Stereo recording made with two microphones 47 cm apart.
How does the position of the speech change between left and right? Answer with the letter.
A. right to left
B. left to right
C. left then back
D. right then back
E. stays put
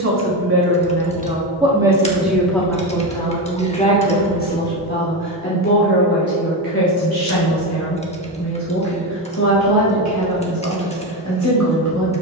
A.